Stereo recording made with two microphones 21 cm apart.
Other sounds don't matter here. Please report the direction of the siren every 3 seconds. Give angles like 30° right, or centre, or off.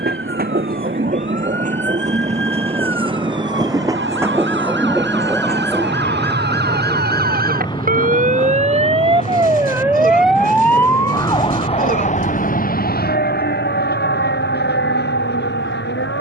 70° right, 70° right, 50° right, centre, 50° left, 60° left.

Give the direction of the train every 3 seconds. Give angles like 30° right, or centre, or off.
40° right, 10° right, 20° left, 40° left, 50° left, 50° left.